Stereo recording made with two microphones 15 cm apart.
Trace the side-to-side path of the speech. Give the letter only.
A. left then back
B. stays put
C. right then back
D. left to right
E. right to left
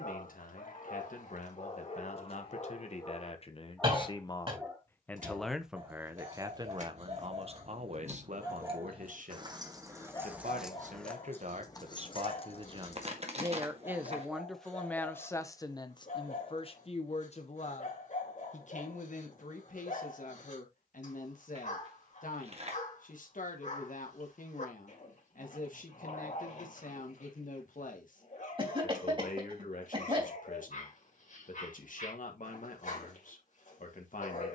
C.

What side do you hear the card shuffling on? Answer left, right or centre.
right.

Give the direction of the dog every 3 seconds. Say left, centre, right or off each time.
left, centre, right, left, left, left, left, left, left, left, left, left.